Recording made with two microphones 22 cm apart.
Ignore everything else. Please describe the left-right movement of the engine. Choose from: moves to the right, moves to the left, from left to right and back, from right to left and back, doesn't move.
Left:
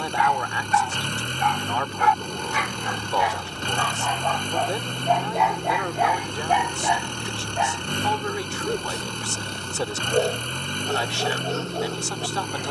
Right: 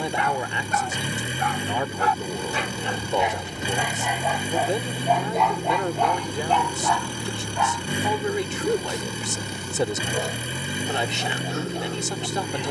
doesn't move.